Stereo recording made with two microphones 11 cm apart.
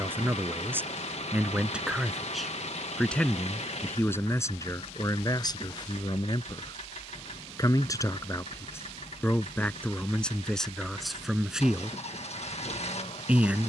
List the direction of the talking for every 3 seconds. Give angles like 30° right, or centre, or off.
10° right, 30° left, 30° left, 10° left, 10° right.